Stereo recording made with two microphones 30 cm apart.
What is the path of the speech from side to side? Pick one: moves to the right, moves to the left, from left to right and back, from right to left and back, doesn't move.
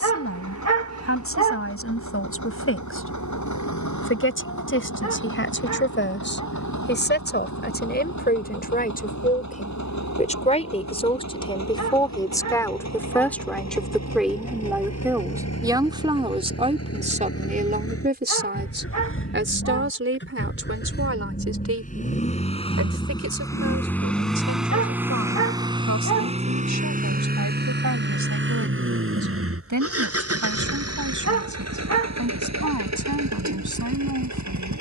moves to the right.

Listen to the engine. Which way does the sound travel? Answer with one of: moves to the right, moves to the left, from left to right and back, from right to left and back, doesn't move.
moves to the right.